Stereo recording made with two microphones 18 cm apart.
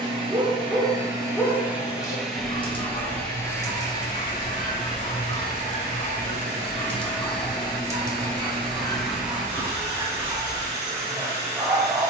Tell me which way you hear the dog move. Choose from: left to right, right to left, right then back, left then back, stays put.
left then back.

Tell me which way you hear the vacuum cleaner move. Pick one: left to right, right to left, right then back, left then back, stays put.
left then back.